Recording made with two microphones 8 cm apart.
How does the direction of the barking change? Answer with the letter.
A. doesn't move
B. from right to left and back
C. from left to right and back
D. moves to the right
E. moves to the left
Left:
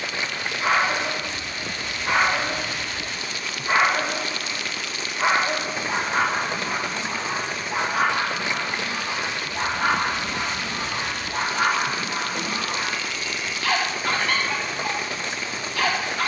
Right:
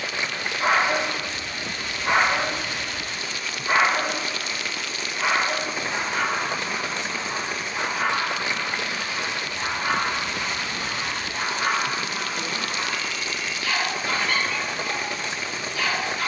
E.